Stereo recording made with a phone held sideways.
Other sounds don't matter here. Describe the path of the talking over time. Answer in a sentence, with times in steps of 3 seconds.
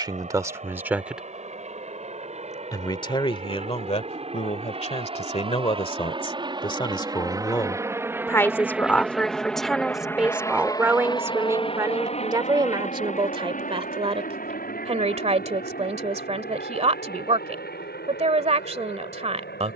You can hear the talking in the centre from 0 s, on the left from 3 s, in the centre from 9 s and on the right from 12 s.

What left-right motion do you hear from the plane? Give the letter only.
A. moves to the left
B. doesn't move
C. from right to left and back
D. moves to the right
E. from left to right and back
A.